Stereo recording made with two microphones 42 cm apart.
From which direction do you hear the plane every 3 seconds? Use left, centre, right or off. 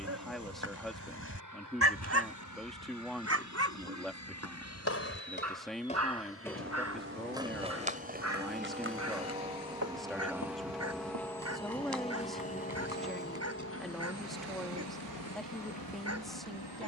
right, right, right, centre, left, left.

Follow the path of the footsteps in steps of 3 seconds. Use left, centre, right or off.
off, left, centre, right, right, off.